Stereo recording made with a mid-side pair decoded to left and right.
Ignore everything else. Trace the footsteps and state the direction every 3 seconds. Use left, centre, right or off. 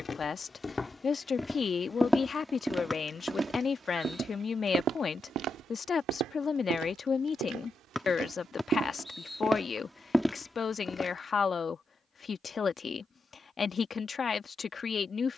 centre, right, right, centre, off.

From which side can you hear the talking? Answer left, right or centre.
left.